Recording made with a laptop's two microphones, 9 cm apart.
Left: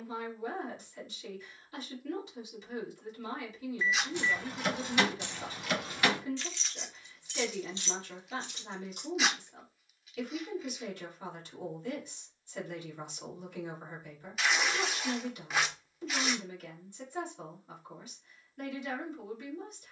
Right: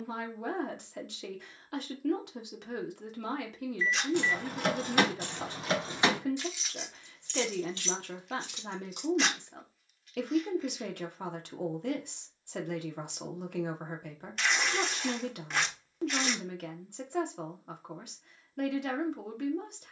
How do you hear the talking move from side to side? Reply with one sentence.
In this clip you hear the talking stay put.